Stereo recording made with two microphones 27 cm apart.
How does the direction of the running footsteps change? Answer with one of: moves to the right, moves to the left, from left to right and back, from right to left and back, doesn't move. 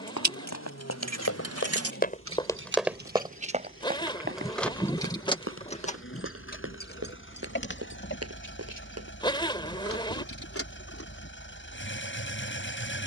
moves to the right.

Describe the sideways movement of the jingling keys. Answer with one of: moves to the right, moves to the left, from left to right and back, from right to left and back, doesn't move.
moves to the left.